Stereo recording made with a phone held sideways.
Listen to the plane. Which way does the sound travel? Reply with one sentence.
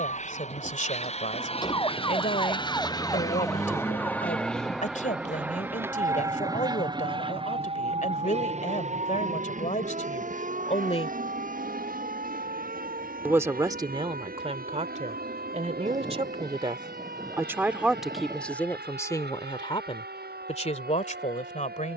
You can hear the plane go from the left side to the right.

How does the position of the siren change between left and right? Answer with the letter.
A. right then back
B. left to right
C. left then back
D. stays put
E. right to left
B.